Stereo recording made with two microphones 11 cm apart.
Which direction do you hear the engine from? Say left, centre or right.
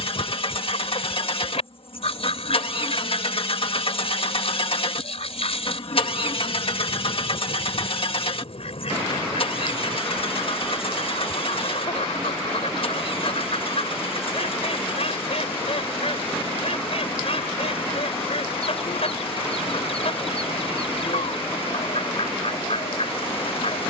left.